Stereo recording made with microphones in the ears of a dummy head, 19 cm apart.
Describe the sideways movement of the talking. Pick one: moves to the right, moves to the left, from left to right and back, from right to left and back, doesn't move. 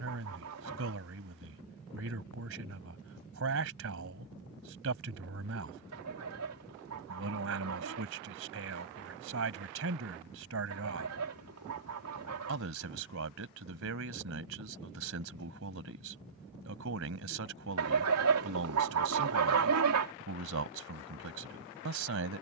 doesn't move.